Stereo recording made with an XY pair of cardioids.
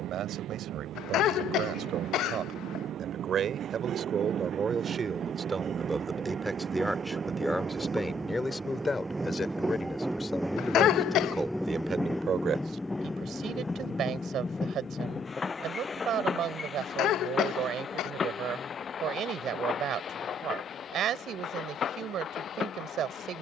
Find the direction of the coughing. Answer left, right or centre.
left.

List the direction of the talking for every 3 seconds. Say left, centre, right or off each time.
right, right, centre, centre, right, right, right, right.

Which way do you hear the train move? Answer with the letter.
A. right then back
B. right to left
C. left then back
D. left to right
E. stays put
B.